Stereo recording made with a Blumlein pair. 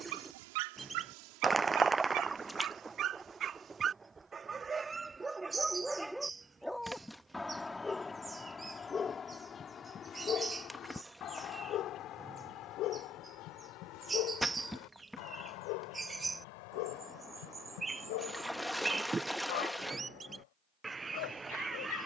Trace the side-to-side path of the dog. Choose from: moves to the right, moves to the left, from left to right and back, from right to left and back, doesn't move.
moves to the left.